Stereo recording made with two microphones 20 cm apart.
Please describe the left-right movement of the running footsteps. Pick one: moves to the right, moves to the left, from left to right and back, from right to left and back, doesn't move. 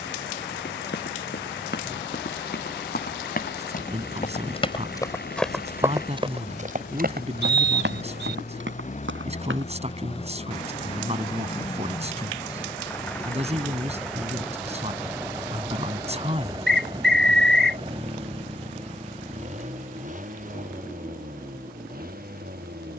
moves to the right.